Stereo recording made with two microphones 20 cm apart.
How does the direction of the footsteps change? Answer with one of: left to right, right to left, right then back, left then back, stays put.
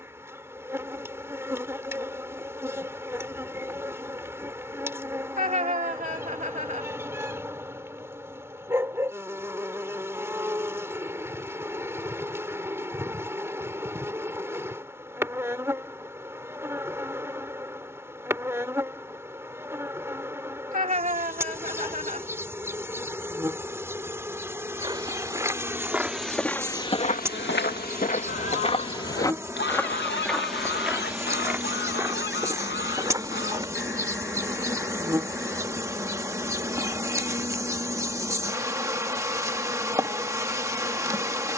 left then back.